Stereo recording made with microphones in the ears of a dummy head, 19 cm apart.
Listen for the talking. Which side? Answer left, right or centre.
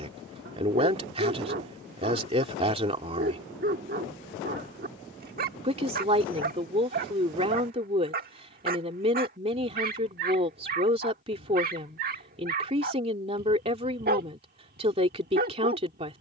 right.